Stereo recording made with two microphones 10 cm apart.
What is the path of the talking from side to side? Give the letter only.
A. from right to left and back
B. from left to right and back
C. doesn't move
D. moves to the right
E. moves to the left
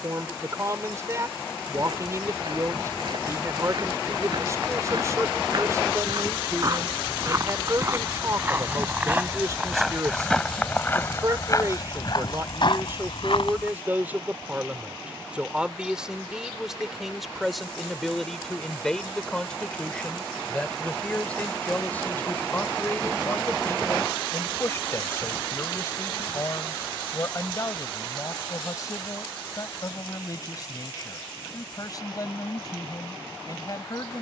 E.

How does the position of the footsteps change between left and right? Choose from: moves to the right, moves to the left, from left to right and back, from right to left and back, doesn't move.
moves to the left.